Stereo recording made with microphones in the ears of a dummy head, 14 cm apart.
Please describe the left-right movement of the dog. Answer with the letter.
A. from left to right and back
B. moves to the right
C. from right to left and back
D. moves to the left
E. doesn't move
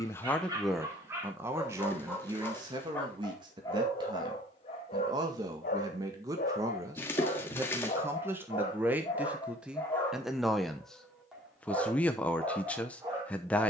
C.